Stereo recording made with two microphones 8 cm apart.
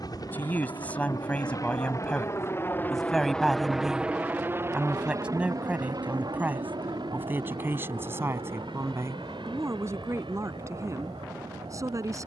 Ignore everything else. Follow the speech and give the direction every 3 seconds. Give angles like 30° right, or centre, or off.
20° left, 10° right, 30° right, 40° right.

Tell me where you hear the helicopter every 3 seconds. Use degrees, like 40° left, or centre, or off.
50° left, 20° right, 70° right, 80° right.